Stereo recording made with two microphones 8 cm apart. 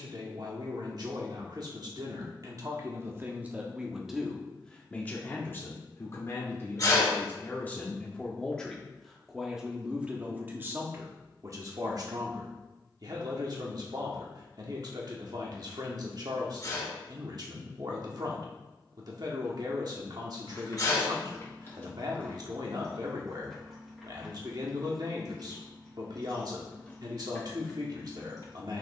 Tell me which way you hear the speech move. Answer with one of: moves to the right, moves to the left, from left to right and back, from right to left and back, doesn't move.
from right to left and back.